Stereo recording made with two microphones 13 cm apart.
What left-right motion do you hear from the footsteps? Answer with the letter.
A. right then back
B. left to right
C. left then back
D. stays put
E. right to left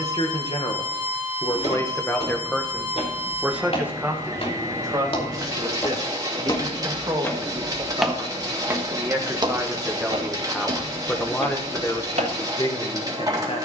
B.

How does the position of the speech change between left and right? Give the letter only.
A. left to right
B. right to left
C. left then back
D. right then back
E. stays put
D.